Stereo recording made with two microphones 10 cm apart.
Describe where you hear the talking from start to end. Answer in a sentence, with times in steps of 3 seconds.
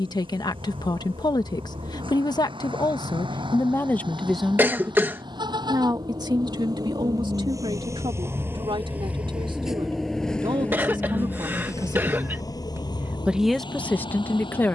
In this clip you hear the talking on the left from 0 s, in the centre from 3 s, on the right from 6 s and in the centre from 12 s.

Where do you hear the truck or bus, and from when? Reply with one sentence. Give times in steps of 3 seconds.
In this clip you hear the truck or bus on the right from 0 s, in the centre from 9 s and on the left from 12 s.